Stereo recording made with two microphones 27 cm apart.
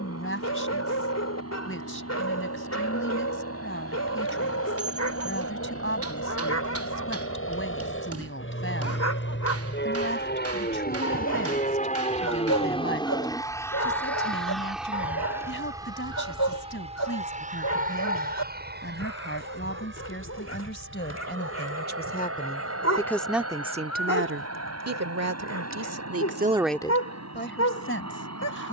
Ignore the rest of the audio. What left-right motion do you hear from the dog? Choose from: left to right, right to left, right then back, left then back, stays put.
stays put.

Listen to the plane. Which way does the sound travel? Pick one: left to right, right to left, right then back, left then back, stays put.
left to right.